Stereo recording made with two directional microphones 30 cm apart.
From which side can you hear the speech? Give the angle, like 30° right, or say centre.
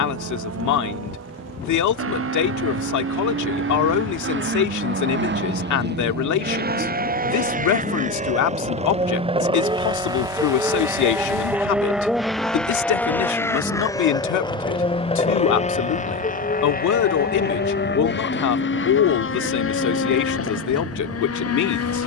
60° left.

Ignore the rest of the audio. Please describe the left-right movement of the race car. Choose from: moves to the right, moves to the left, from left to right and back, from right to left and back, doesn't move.
moves to the left.